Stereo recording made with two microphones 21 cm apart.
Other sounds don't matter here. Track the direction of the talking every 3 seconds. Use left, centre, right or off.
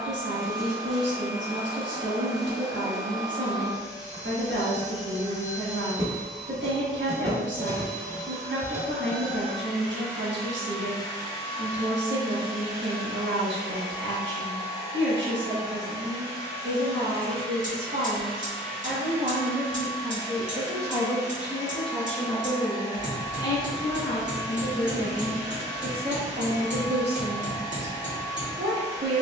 right, right, right, right, right, right, right, centre, centre, right.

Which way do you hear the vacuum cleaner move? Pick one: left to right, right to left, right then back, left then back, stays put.
left then back.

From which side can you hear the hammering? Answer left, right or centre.
right.